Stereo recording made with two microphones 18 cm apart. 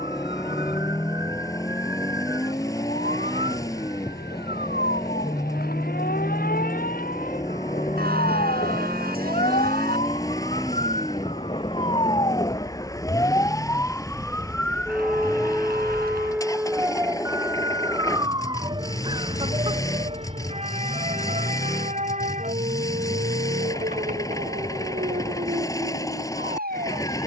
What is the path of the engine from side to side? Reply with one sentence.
You can hear the engine stay in one place.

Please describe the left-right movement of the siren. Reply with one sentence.
You can hear the siren move to the right.